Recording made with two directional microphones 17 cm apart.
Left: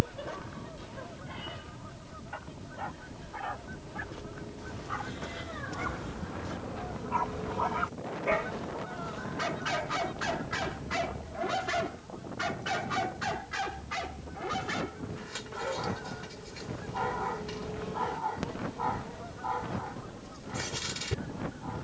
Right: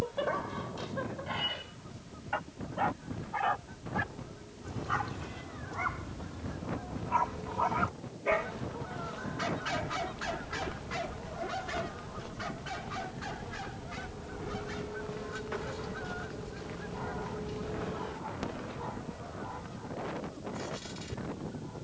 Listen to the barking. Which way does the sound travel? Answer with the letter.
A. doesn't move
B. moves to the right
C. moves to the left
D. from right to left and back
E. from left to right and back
C.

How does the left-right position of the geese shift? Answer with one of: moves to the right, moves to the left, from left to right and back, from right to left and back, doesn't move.
from left to right and back.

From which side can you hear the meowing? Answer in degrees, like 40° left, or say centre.
50° left.